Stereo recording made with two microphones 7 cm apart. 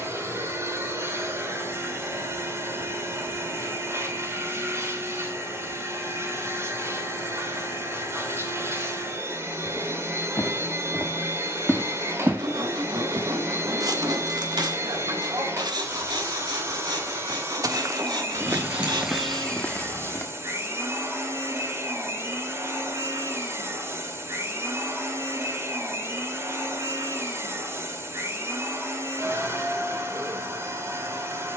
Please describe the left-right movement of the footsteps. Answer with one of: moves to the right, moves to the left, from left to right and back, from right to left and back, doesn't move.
from left to right and back.